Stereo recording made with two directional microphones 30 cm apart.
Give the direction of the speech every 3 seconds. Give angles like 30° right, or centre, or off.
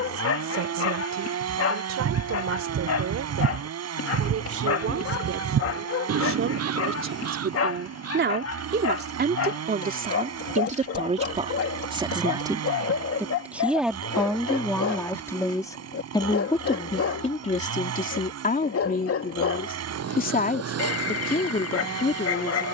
60° right, 50° right, 40° right, 20° right, centre, 20° left, 30° left, 30° left.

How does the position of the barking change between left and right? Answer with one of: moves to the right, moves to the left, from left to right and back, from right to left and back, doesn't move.
doesn't move.